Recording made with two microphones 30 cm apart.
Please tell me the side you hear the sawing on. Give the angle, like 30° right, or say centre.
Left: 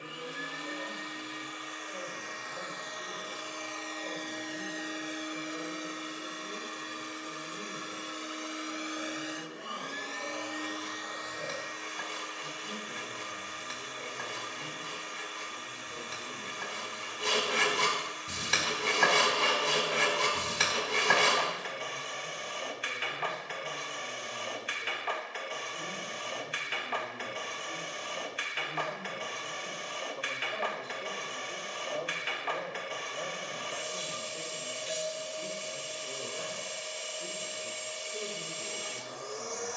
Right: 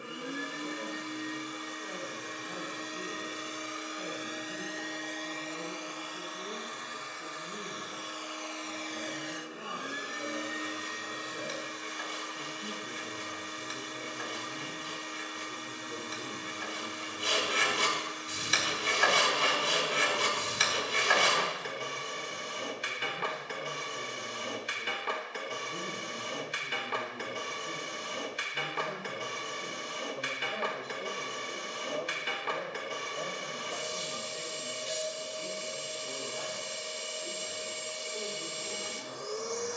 70° left.